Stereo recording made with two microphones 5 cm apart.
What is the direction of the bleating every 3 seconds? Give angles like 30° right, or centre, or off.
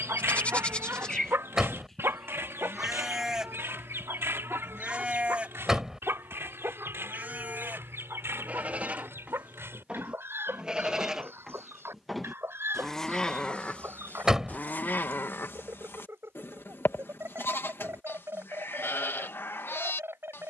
10° left, 20° right, 40° right, 20° right, 20° left, 50° left, 50° left.